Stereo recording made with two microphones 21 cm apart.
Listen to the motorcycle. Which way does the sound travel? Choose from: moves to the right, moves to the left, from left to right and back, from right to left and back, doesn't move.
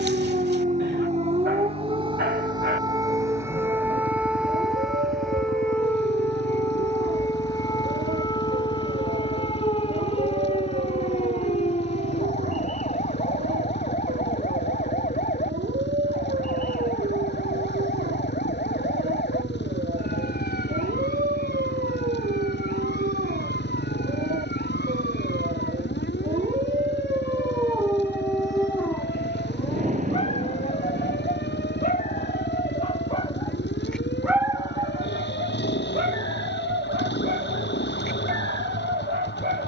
doesn't move.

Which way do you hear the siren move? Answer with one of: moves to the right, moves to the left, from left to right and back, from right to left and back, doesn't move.
moves to the left.